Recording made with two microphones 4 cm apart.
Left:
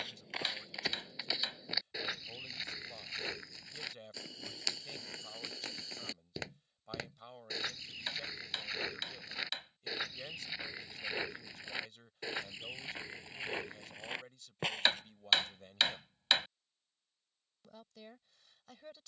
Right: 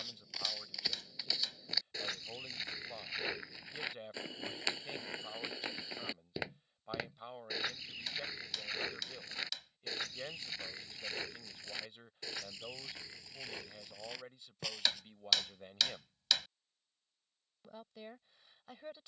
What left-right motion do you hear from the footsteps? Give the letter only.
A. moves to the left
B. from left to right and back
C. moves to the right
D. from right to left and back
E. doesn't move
B.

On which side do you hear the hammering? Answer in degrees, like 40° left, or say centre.
30° left.